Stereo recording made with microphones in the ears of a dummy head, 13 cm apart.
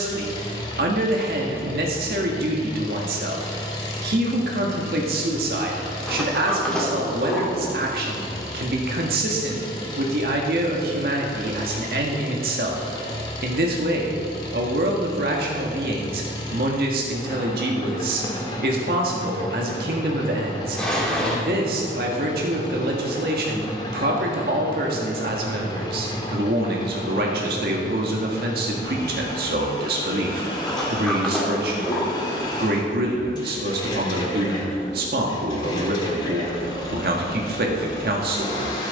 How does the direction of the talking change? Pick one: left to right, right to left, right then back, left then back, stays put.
stays put.